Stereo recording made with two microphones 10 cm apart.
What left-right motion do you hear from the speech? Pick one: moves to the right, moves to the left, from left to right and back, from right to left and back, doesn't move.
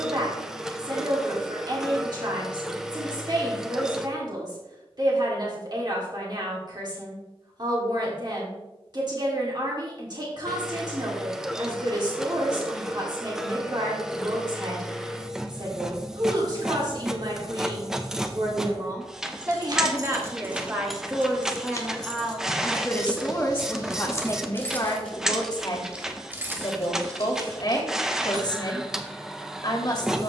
moves to the left.